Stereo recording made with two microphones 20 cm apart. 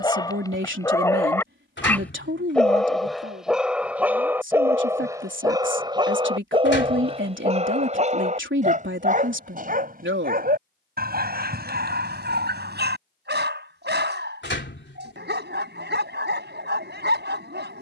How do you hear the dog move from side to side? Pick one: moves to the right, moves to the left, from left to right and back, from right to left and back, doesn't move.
moves to the right.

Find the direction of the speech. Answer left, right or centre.
right.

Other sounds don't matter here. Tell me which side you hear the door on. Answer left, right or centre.
left.